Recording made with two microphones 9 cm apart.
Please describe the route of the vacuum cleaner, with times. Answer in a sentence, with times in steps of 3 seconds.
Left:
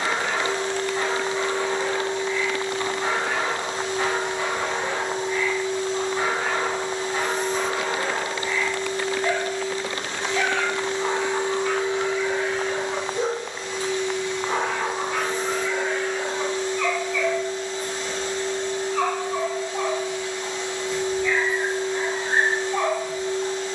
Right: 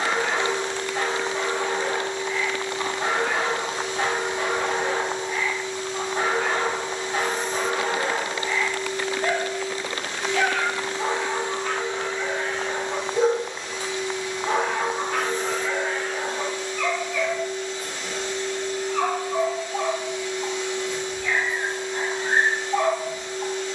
You can hear the vacuum cleaner on the left from 0 s, in the centre from 12 s and on the left from 15 s.